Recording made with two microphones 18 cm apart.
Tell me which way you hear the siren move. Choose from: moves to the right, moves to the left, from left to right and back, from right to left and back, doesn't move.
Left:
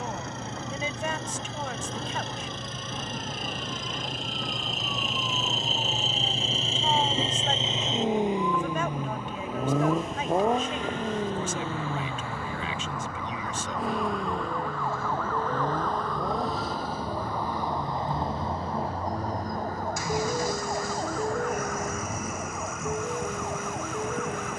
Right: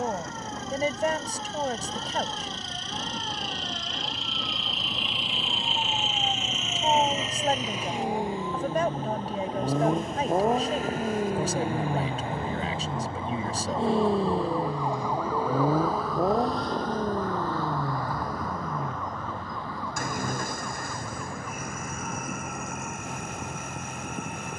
moves to the left.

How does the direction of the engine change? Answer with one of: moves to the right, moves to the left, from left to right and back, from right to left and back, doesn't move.
moves to the right.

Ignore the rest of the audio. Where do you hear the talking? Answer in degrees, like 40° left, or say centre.
40° right.